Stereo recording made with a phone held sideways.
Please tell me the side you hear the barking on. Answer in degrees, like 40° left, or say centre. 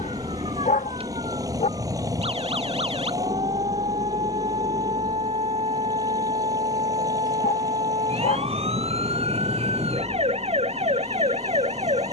60° left.